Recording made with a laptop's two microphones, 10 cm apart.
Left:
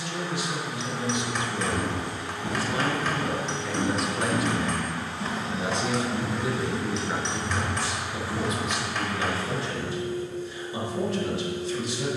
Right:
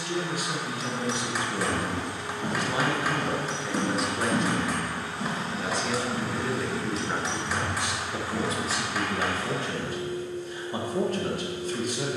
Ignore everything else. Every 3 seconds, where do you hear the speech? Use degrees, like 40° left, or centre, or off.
30° right, centre, 10° right, 50° right.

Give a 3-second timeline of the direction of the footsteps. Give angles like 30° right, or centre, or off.
50° right, 20° right, 20° left, off.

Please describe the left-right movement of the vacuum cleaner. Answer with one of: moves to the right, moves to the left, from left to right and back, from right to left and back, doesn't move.
from left to right and back.